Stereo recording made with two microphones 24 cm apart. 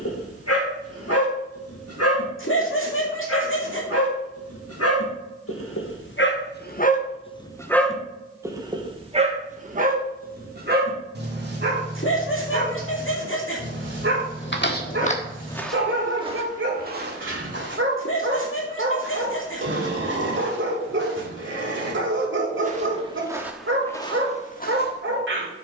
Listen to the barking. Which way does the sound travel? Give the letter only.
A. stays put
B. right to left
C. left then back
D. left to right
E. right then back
D.